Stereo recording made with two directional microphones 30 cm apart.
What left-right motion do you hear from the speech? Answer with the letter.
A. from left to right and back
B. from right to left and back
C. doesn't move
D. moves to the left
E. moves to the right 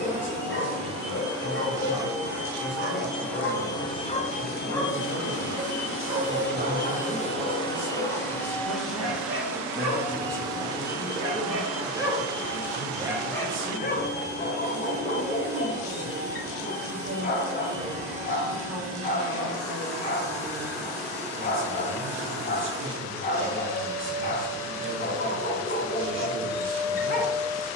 E.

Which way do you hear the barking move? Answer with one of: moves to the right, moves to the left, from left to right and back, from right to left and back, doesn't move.
from left to right and back.